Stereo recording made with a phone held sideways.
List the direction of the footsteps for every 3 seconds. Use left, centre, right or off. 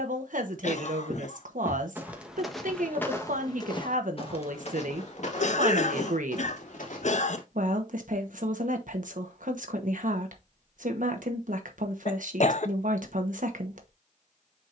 centre, left, left, off, off.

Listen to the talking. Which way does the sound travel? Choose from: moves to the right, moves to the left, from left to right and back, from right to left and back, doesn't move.
doesn't move.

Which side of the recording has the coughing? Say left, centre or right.
left.